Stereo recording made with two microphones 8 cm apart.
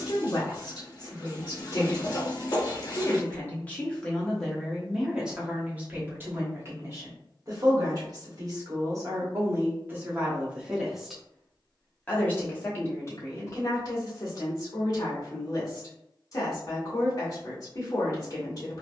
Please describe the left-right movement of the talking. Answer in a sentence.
You can hear the talking go right and come back.